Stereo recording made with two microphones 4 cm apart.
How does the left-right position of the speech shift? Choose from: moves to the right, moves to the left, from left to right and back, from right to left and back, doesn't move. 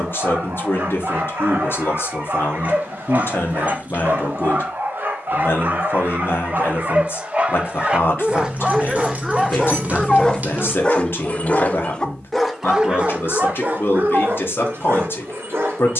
doesn't move.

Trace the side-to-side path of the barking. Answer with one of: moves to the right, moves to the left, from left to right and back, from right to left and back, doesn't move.
from right to left and back.